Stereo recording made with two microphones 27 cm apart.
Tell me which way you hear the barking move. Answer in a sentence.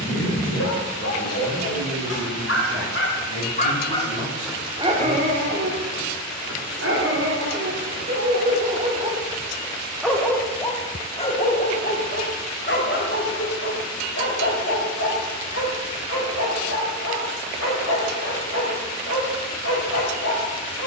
You can hear the barking go right and come back.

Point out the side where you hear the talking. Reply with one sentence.
You can hear the talking on the left.